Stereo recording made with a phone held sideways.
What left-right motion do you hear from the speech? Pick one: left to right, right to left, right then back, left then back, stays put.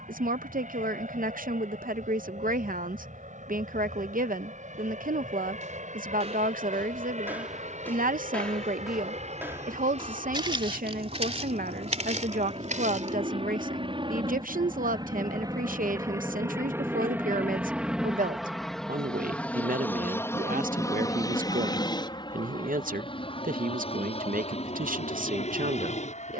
stays put.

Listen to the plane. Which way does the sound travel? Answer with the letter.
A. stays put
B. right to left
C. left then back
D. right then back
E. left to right
B.